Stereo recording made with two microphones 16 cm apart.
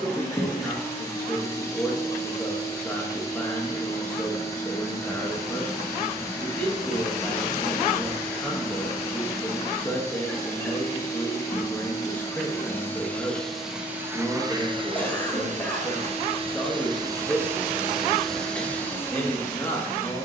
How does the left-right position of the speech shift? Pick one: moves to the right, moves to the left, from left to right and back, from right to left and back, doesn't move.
doesn't move.